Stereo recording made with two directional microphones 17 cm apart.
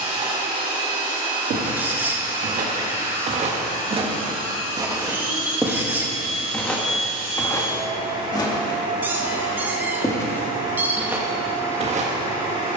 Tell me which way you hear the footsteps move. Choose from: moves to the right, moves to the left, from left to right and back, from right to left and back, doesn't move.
from right to left and back.